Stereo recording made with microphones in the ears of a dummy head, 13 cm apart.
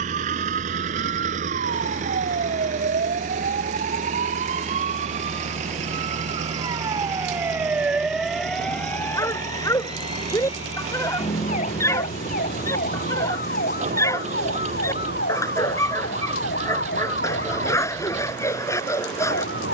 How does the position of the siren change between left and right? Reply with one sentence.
You can hear the siren move to the left.